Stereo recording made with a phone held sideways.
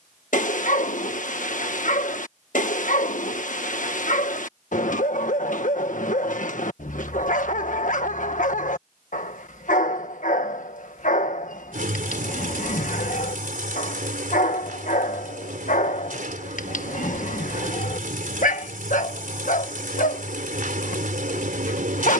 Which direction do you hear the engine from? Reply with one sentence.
You can hear the engine on the right.